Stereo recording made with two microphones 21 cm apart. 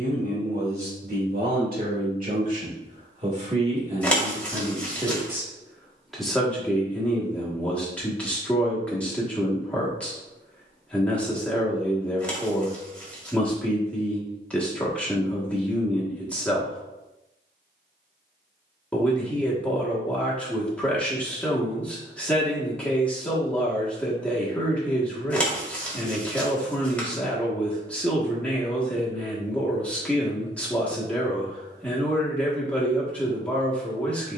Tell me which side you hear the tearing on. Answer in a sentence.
In this clip you hear the tearing in the centre.